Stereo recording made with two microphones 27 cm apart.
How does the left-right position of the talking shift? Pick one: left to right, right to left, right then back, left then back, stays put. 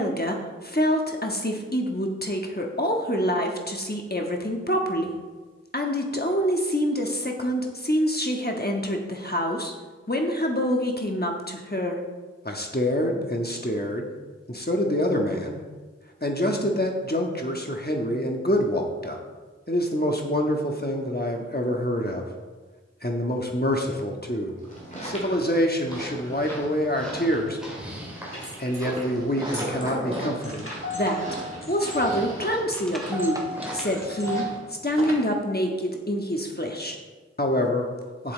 stays put.